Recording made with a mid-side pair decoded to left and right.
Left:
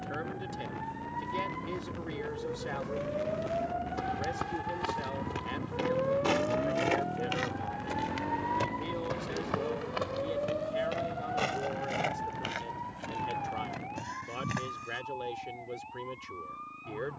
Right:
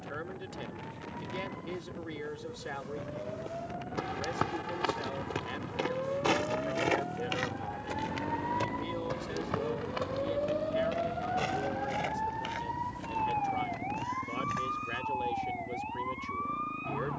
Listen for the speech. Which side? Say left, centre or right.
centre.